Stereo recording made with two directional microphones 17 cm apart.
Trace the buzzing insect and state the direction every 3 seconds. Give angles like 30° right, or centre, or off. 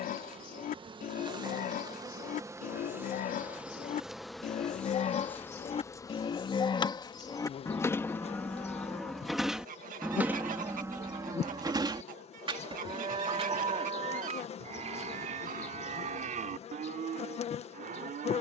20° right, centre, 30° left, 40° left, 40° left, 40° left.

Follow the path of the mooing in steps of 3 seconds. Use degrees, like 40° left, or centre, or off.
60° left, 50° left, 20° left, 10° right, 40° right, 50° right.